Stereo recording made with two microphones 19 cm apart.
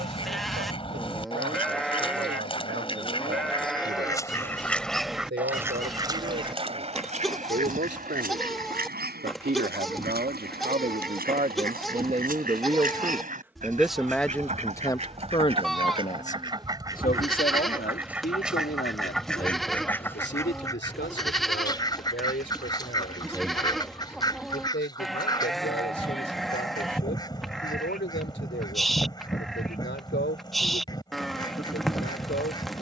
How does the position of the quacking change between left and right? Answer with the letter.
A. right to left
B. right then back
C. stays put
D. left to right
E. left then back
B.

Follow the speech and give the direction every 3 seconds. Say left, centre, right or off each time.
right, right, right, right, centre, left, left, left, left, left, left.